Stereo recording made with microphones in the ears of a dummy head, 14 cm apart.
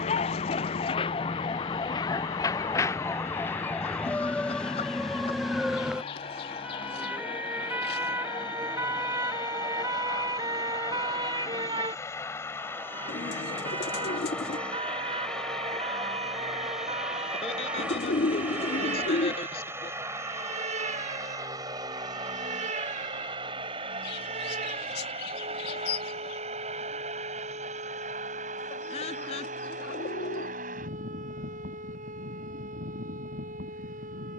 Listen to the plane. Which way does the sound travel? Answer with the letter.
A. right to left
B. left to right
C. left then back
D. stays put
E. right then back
B.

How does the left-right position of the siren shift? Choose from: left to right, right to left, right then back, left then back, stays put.
left to right.